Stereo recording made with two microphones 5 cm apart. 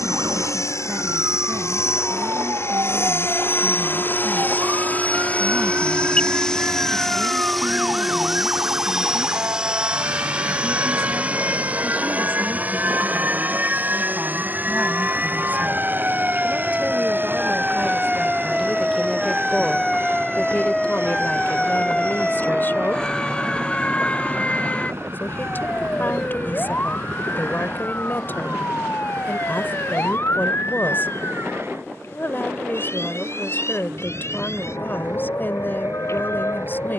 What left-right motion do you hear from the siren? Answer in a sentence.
You can hear the siren travel towards the left.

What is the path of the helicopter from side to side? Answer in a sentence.
You can hear the helicopter move from left to right.